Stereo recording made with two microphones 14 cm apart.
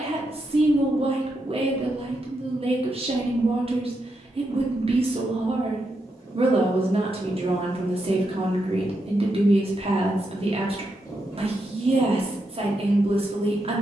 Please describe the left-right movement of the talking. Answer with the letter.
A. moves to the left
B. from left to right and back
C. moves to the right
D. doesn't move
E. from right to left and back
D.